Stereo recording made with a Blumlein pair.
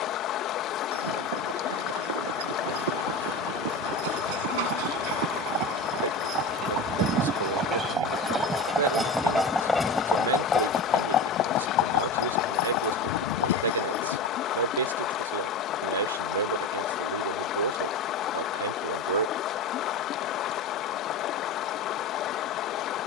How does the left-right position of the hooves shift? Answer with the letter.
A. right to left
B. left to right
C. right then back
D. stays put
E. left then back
A.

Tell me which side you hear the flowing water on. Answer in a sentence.
You can hear the flowing water on the left.